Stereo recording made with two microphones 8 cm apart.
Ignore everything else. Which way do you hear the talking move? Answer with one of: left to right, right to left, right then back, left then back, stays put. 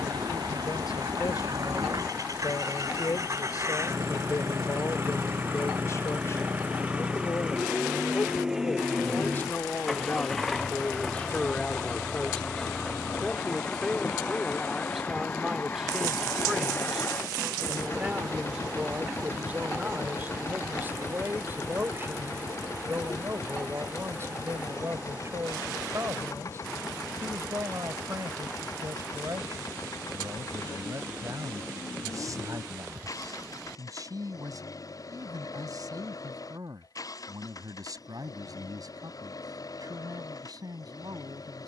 left to right.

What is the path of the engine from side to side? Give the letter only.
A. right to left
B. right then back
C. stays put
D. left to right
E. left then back
A.